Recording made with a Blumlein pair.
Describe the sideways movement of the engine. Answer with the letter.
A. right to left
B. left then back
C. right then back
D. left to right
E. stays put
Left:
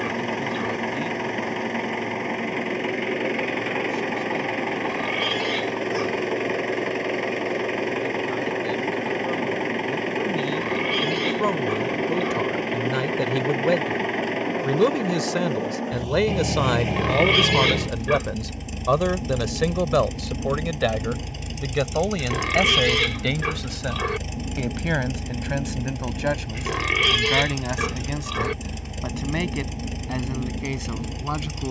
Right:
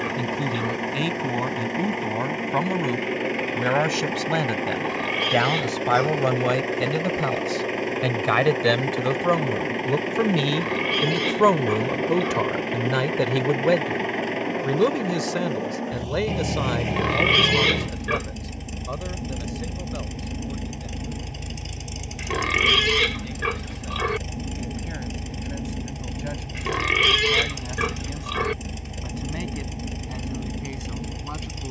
E.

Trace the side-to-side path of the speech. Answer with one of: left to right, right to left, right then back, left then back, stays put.
right to left.